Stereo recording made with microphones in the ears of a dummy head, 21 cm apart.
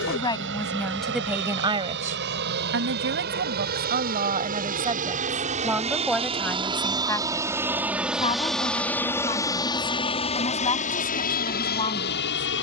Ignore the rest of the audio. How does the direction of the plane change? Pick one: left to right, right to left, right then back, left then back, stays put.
right to left.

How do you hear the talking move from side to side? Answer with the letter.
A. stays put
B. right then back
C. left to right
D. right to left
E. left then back
B.